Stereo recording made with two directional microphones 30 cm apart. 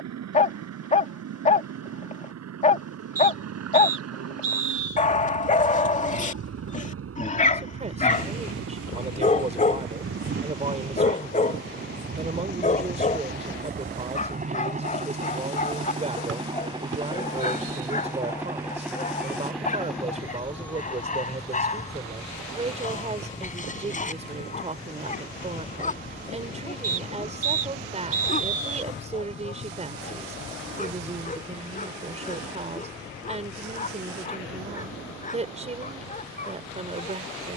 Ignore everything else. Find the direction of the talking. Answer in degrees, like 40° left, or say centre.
20° right.